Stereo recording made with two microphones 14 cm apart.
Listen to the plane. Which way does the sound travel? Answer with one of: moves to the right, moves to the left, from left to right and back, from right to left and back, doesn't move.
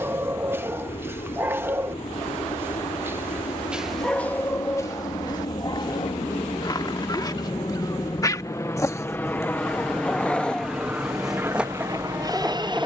moves to the right.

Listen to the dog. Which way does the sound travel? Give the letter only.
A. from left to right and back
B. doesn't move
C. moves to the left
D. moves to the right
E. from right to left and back
E.